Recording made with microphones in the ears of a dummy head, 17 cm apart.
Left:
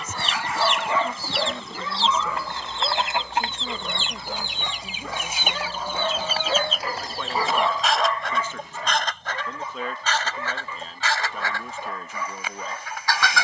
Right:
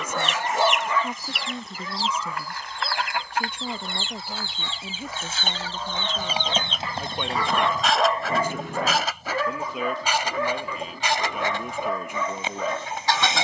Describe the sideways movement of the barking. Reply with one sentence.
In this clip you hear the barking go left and come back.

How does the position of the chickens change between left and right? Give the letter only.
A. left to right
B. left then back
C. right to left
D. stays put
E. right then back
A.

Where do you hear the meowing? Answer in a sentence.
You can hear the meowing on the left.